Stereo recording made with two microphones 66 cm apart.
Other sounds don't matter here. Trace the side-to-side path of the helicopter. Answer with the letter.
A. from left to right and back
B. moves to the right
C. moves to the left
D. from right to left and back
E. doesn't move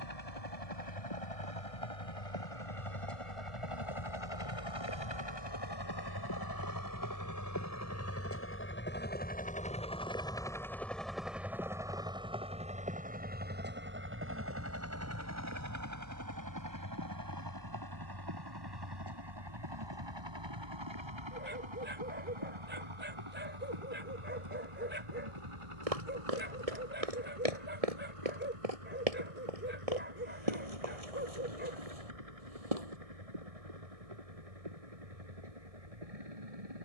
B.